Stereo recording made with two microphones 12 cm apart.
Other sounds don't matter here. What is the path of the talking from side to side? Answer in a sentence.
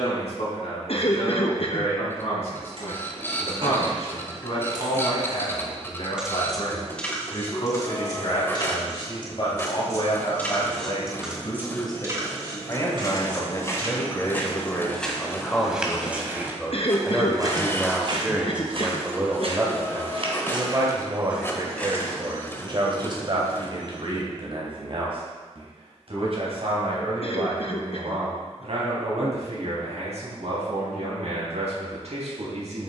In this clip you hear the talking move from left to right.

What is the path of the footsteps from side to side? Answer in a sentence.
In this clip you hear the footsteps go right and come back.